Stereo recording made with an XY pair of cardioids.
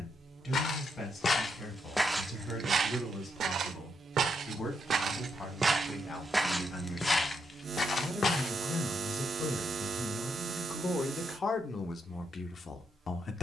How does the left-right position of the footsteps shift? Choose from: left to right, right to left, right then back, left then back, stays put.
right then back.